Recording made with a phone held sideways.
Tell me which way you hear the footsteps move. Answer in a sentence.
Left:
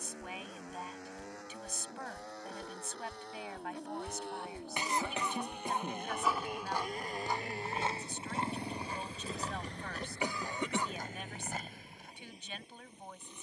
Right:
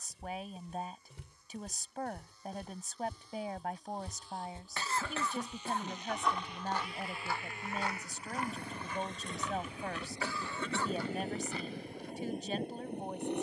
In this clip you hear the footsteps go from the right side to the left.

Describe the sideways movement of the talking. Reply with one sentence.
You can hear the talking stay in one place.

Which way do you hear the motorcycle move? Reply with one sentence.
You can hear the motorcycle move to the right.